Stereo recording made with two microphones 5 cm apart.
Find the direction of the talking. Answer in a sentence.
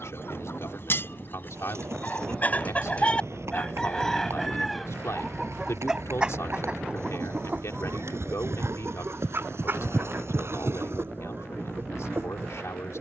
In this clip you hear the talking on the left.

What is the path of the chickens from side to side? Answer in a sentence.
In this clip you hear the chickens travel towards the right.